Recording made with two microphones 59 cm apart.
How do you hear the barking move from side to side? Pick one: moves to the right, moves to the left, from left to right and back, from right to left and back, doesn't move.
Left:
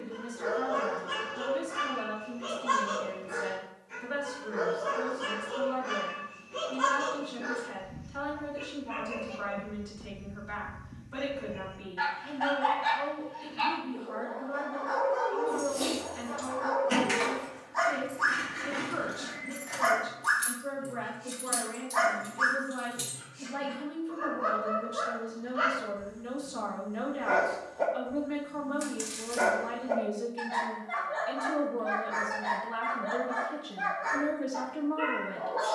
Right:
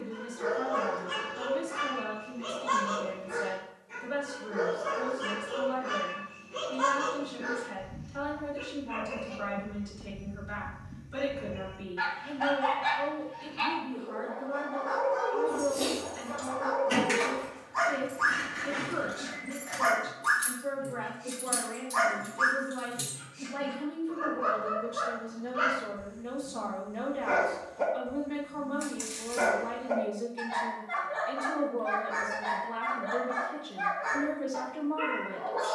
moves to the right.